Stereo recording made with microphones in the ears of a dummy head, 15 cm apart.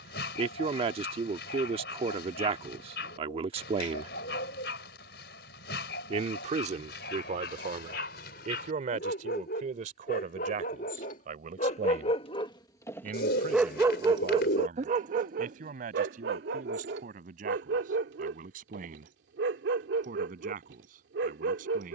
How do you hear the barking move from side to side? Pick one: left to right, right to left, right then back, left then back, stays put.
left to right.